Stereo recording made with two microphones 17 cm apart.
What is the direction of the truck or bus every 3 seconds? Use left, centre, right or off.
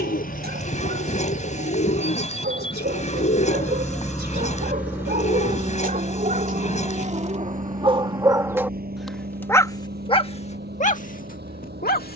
left, centre, right, right.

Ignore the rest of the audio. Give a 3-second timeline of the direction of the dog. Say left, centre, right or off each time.
right, right, right, left.